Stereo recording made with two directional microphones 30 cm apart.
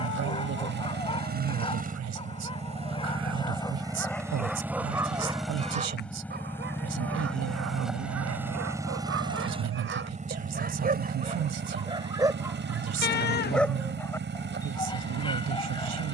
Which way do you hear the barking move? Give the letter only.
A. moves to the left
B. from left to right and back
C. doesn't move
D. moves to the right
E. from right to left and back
B.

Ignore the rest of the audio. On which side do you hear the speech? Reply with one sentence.
In this clip you hear the speech on the right.